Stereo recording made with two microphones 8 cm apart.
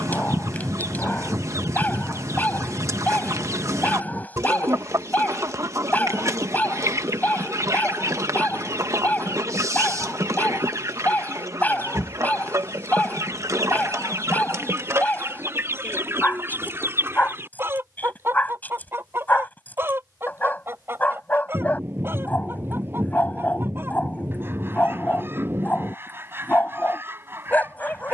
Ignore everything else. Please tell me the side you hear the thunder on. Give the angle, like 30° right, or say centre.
30° right.